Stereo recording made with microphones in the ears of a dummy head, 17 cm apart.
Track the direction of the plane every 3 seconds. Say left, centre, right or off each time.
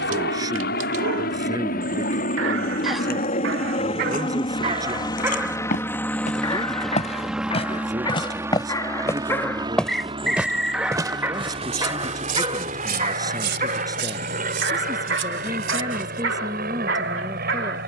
left, left, centre, right, right, right.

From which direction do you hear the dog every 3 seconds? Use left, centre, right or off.
right, right, left, centre, right, right.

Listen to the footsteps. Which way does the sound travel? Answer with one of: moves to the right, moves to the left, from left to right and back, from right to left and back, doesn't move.
moves to the right.